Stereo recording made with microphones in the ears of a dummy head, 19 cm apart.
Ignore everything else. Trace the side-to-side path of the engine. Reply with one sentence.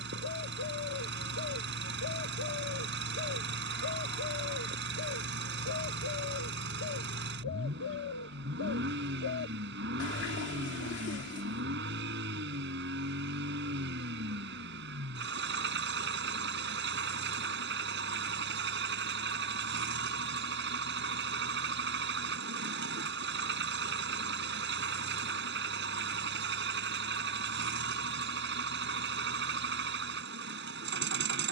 In this clip you hear the engine stay put.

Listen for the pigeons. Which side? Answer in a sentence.
In this clip you hear the pigeons on the left.